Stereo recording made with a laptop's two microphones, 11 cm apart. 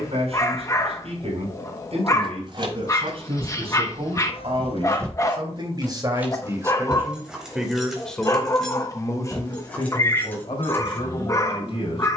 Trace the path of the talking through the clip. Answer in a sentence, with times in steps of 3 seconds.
You can hear the talking on the right from 0 s, in the centre from 6 s and on the left from 9 s.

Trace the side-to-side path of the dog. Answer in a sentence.
In this clip you hear the dog stay put.